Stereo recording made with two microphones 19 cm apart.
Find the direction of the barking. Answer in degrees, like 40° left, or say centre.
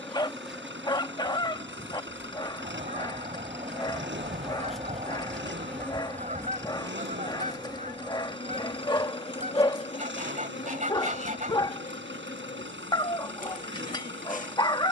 20° left.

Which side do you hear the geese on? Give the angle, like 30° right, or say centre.
40° right.